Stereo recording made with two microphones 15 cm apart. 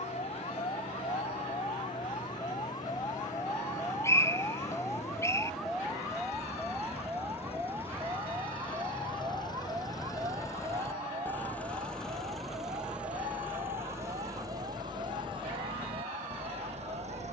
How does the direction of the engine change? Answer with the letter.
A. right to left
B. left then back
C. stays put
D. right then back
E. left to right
E.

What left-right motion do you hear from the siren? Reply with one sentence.
In this clip you hear the siren move from left to right.